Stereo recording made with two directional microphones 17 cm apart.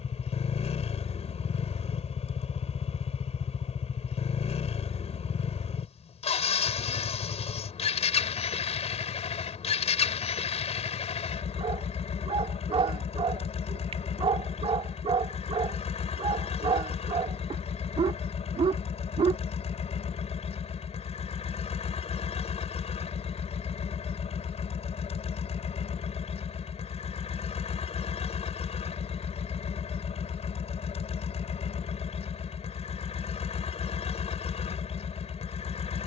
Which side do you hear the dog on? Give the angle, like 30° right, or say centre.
30° right.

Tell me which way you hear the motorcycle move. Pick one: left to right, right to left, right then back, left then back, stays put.
stays put.